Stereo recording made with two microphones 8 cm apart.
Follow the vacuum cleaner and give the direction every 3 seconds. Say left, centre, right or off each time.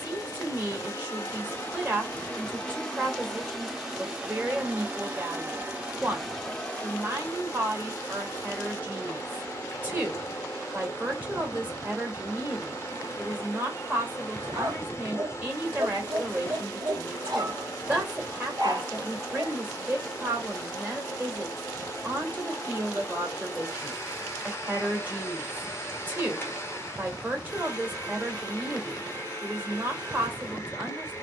left, centre, left, left, left, left, left, left, left, left, left.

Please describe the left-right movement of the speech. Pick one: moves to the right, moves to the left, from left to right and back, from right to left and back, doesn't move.
doesn't move.